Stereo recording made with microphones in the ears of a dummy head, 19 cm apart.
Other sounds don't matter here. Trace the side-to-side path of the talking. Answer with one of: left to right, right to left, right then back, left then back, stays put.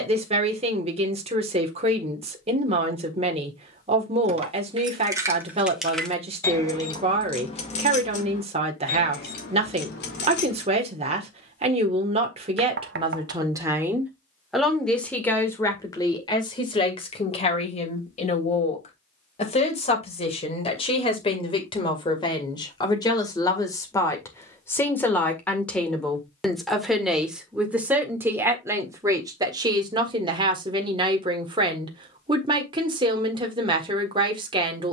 left then back.